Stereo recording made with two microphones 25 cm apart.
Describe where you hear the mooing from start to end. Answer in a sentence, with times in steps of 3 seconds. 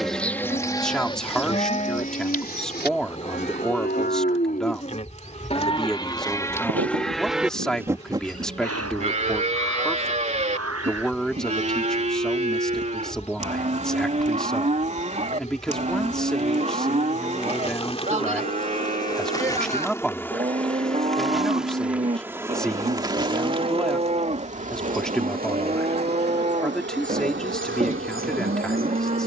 In this clip you hear the mooing on the left from 0 s, in the centre from 6 s and on the right from 9 s.